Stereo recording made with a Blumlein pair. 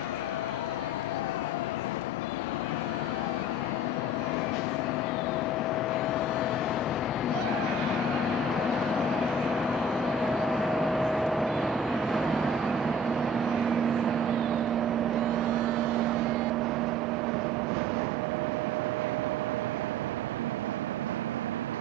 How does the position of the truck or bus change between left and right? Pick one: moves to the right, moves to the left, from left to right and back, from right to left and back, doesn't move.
moves to the right.